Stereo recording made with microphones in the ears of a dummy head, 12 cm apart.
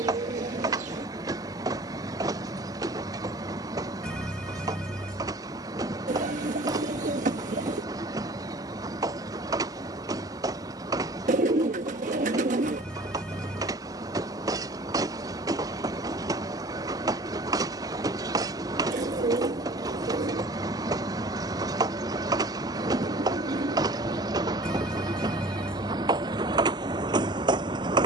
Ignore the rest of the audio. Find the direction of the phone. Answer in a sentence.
You can hear the phone in the centre.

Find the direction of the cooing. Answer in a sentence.
You can hear the cooing on the right.